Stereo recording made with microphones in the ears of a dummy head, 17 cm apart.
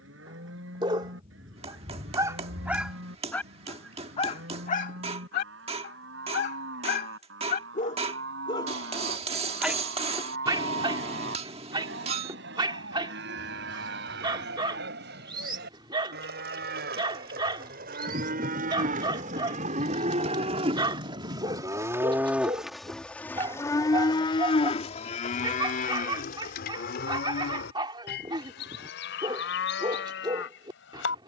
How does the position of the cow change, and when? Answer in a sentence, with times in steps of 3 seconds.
In this clip you hear the cow on the right from 0 s, in the centre from 21 s and on the left from 24 s.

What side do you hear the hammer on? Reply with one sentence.
In this clip you hear the hammer on the right.